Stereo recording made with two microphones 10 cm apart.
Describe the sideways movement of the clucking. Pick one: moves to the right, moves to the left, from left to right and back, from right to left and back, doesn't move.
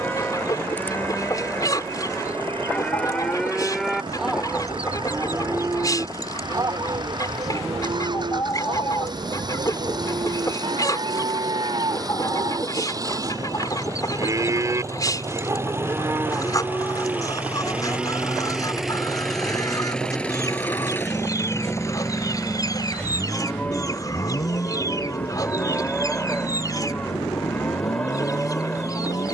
doesn't move.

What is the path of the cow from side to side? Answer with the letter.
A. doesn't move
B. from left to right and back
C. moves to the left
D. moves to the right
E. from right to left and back
B.